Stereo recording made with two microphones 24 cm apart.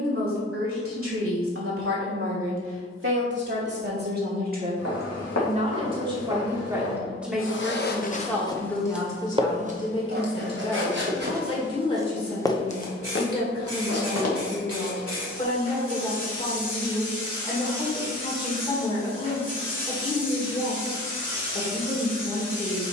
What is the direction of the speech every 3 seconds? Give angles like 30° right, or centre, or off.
60° right, 40° right, centre, 20° left, 20° left, 20° left, 20° left, 20° left.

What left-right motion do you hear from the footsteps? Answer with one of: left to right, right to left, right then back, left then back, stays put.
right then back.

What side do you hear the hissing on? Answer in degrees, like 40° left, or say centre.
60° right.